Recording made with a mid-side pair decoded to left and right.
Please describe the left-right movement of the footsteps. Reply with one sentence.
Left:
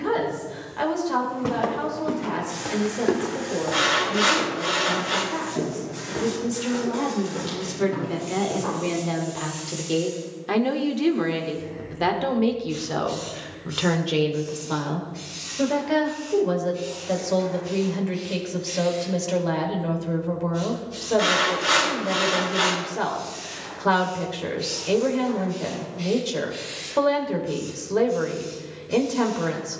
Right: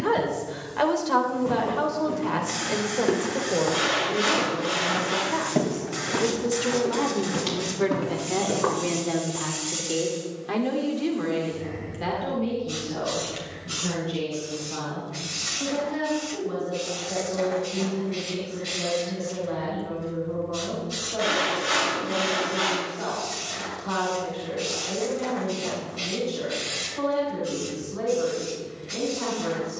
In this clip you hear the footsteps go from the left side to the right.